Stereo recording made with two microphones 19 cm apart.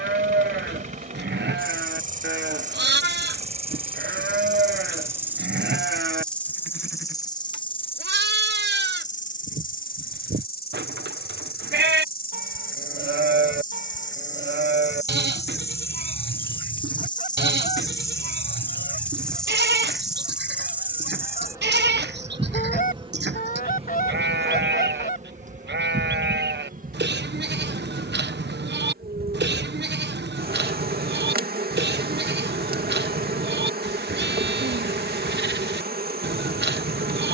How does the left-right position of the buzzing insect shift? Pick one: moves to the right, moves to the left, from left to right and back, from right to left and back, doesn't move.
from right to left and back.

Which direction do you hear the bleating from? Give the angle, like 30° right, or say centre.
60° right.